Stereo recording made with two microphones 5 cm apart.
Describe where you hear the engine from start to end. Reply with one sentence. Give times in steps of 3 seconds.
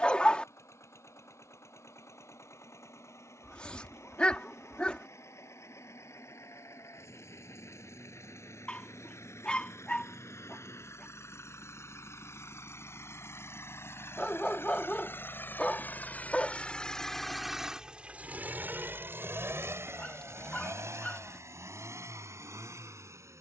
You can hear the engine on the left from 0 s and on the right from 18 s.